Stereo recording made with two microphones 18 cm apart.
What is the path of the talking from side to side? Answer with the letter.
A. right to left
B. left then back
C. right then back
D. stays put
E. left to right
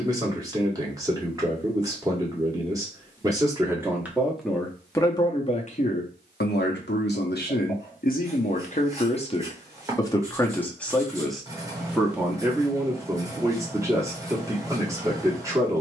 B.